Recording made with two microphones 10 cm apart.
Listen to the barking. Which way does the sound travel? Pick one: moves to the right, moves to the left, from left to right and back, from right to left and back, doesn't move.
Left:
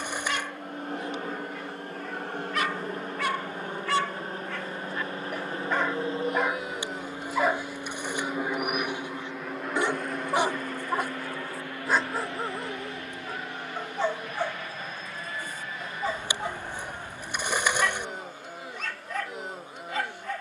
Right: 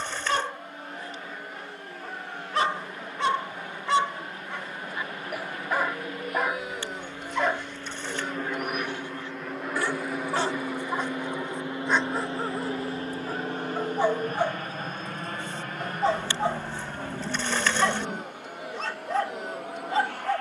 from right to left and back.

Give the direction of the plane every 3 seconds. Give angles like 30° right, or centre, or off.
50° left, 40° left, 20° left, 10° right, 40° right, 50° right, 60° right.